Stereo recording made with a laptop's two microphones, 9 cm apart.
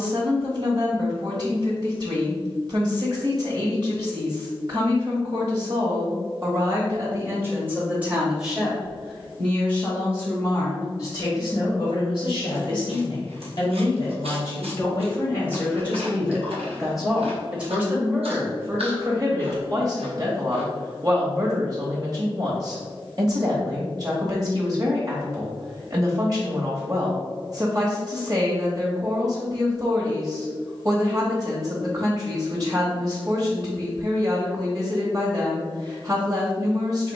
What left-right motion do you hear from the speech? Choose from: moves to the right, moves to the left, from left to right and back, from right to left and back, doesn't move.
from right to left and back.